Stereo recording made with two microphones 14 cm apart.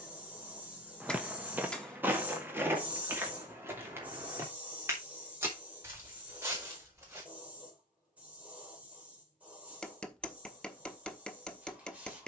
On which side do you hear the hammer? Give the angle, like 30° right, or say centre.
10° left.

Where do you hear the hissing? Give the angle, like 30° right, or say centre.
10° right.